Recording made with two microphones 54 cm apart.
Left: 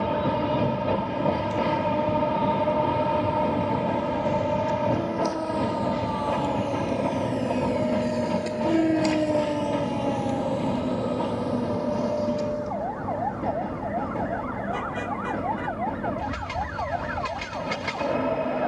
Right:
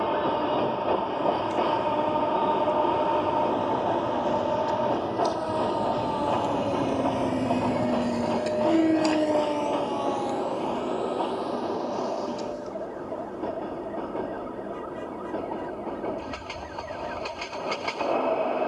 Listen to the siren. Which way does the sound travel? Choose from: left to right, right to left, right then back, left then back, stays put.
right to left.